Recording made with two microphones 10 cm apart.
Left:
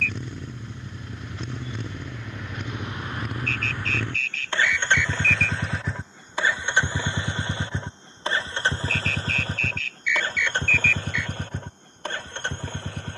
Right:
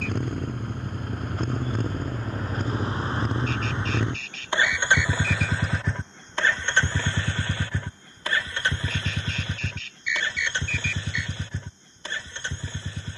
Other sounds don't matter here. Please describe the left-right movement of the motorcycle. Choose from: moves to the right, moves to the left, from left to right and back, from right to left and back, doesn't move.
moves to the left.